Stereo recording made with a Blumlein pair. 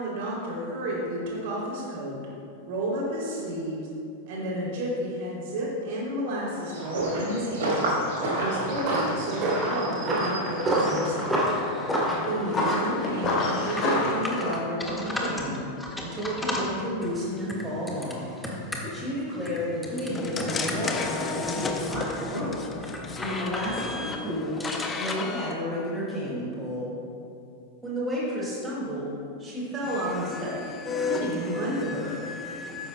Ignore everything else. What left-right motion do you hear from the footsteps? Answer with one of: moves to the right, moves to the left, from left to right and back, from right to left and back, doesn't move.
moves to the left.